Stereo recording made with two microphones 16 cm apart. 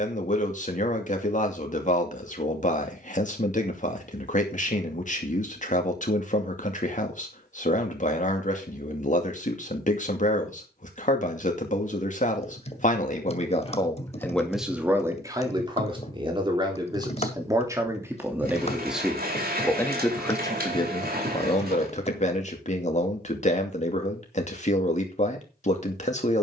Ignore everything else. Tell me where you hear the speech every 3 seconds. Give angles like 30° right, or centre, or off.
50° left, 50° left, 50° left, 50° left, 30° left, 20° right, 10° left, 40° left, 40° left.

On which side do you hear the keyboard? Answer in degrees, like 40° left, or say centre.
40° left.